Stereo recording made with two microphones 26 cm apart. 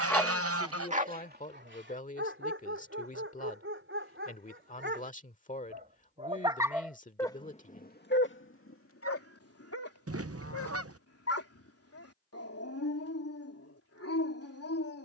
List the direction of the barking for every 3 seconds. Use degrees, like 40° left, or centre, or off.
40° right, 50° right, 20° left, 70° left, 70° left.